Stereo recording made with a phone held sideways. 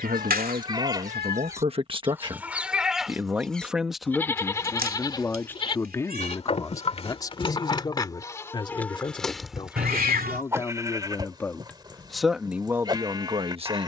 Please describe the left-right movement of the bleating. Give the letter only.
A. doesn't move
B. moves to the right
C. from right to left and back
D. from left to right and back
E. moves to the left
C.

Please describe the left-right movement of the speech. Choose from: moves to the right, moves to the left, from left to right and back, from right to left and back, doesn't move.
from right to left and back.